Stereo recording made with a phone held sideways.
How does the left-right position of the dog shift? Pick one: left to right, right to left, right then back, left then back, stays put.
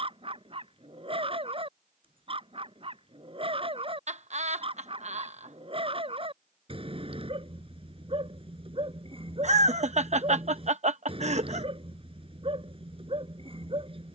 stays put.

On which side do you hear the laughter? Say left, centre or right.
right.